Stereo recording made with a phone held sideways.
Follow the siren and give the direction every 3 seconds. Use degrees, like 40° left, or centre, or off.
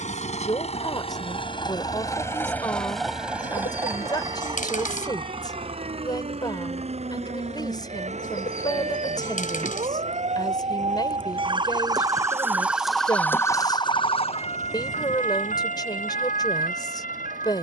70° right, 70° right, 70° right, 50° right, 20° left, 70° left.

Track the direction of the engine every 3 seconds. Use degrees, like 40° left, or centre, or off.
30° left, 30° right, 50° right, 60° right, 70° right, 70° right.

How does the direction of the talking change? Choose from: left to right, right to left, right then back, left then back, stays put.
stays put.